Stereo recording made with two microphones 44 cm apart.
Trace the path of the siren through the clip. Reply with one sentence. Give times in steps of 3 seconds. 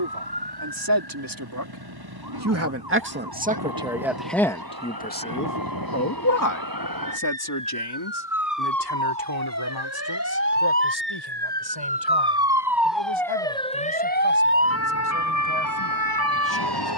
In this clip you hear the siren on the right from 0 s, in the centre from 12 s and on the left from 15 s.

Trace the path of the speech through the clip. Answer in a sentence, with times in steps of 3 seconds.
In this clip you hear the speech on the right from 0 s, in the centre from 3 s and on the left from 6 s.